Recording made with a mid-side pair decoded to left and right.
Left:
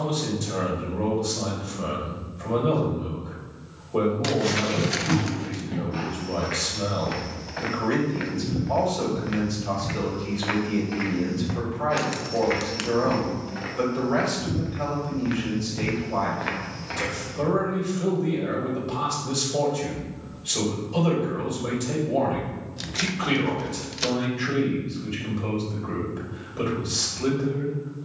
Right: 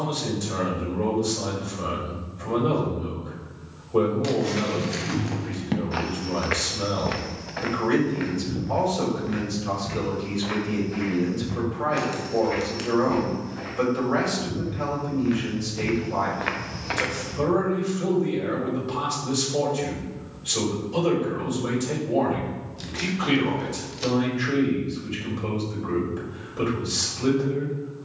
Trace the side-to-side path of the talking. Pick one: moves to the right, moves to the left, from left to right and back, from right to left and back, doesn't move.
doesn't move.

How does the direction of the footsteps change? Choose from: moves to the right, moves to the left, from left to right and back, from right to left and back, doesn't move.
from right to left and back.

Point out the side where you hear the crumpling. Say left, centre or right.
left.